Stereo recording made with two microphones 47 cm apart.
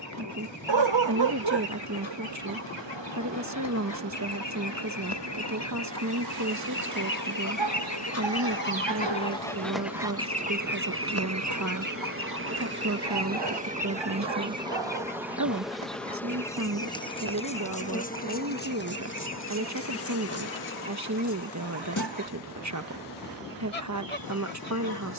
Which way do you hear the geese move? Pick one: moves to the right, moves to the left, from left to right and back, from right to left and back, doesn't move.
moves to the right.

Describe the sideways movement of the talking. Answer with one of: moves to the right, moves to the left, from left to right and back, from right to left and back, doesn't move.
doesn't move.